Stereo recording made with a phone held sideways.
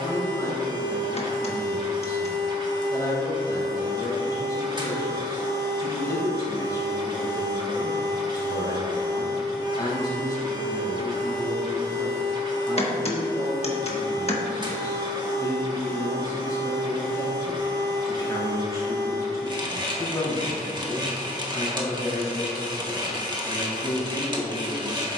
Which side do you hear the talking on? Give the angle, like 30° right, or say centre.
20° left.